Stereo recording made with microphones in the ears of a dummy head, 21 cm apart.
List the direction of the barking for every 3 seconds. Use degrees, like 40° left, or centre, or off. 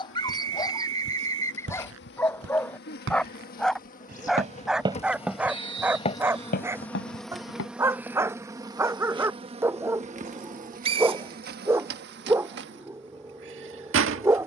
10° left, centre, 10° right, 10° right, 10° right.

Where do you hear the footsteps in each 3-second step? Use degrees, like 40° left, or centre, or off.
60° right, 20° right, 50° left, off, off.